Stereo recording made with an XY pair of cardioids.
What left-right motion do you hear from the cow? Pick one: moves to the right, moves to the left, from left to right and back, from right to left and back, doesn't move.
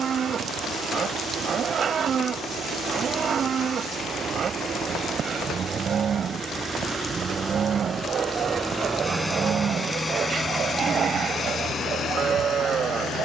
doesn't move.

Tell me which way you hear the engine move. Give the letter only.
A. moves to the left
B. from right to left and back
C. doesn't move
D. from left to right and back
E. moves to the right
A.